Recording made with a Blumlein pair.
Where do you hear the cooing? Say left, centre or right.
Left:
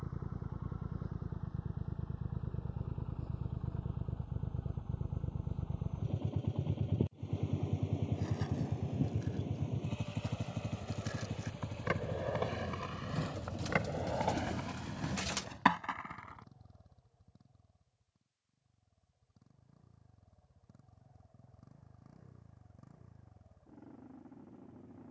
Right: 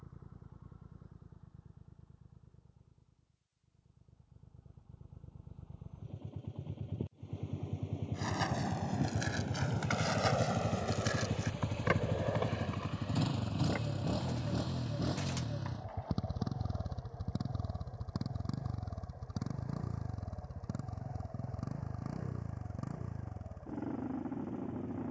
left.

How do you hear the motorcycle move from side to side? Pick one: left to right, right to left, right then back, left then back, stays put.
left to right.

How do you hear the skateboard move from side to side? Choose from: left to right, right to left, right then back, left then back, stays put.
right to left.